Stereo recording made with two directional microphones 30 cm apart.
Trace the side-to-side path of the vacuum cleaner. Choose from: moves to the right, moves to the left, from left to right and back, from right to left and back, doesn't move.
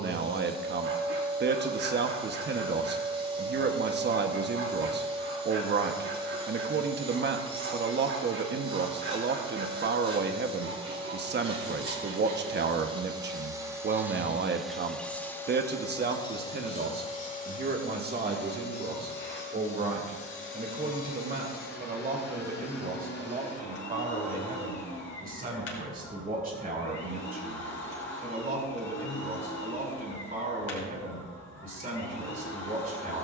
moves to the left.